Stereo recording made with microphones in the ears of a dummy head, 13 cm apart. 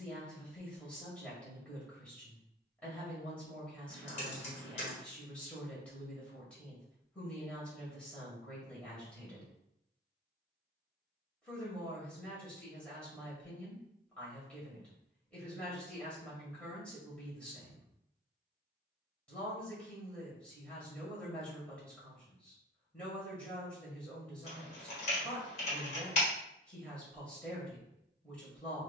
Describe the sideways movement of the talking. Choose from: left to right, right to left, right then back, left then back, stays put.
stays put.